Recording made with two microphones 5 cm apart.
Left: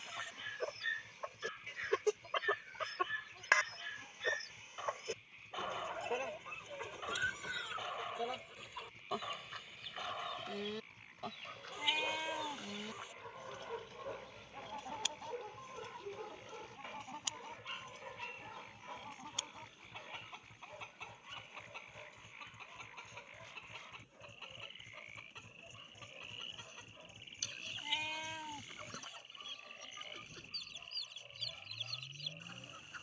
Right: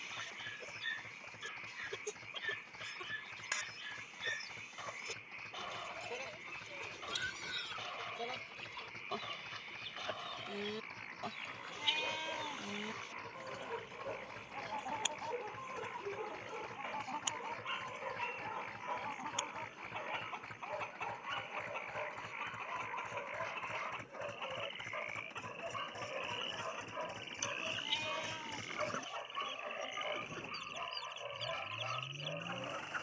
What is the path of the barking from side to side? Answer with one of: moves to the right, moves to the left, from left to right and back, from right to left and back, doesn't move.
moves to the right.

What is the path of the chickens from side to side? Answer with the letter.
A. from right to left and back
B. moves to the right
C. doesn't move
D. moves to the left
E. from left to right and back
B.